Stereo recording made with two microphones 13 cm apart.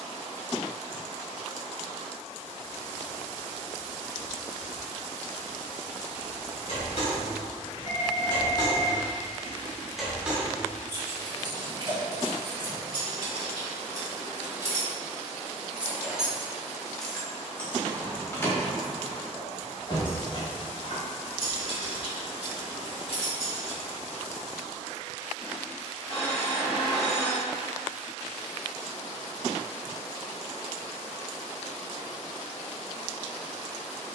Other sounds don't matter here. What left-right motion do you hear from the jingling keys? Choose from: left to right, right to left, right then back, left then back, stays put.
right then back.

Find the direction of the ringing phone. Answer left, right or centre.
left.